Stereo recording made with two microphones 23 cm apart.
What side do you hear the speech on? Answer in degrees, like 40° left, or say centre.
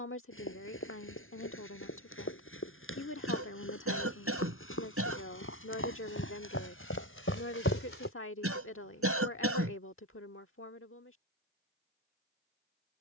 70° left.